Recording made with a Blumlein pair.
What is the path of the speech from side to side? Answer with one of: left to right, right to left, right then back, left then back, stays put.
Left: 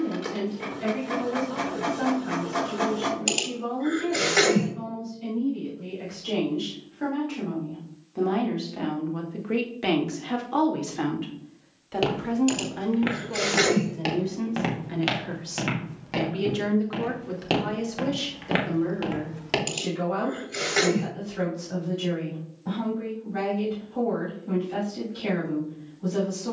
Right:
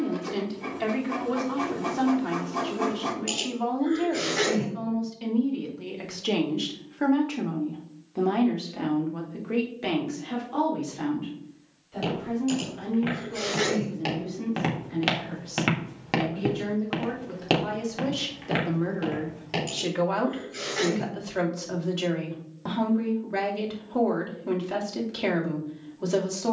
left then back.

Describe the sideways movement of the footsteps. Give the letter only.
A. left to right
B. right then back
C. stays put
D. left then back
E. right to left
B.